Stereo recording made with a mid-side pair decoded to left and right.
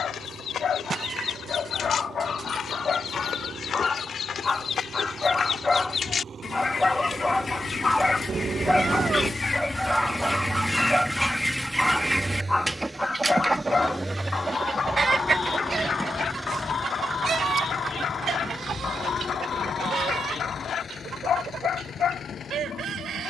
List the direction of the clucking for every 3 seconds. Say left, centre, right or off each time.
left, left, left, centre, right, right, right, right.